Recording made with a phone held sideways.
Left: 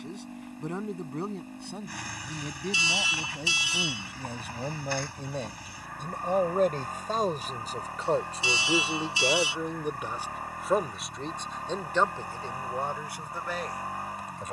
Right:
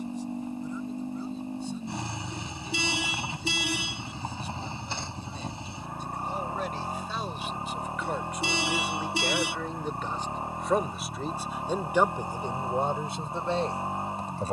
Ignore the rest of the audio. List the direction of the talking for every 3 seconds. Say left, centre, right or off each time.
left, left, left, centre, right.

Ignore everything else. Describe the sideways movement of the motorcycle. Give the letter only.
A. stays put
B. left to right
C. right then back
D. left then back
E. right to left
A.